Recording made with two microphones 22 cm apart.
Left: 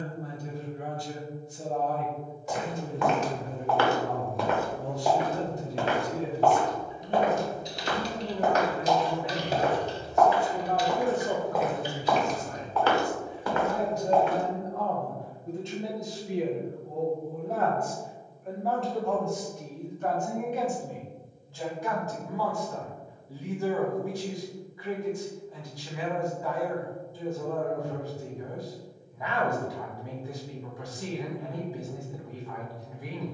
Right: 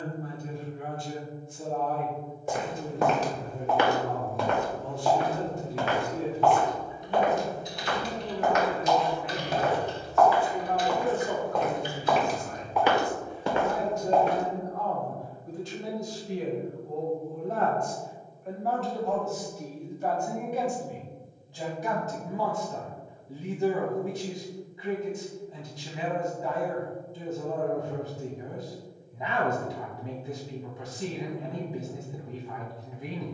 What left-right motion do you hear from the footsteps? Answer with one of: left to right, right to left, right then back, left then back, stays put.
left then back.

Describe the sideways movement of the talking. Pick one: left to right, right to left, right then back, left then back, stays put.
left to right.